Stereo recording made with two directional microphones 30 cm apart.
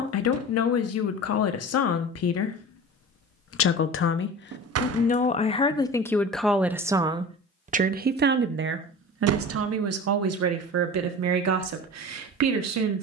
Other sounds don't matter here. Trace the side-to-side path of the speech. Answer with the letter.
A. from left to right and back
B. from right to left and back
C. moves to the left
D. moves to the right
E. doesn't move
D.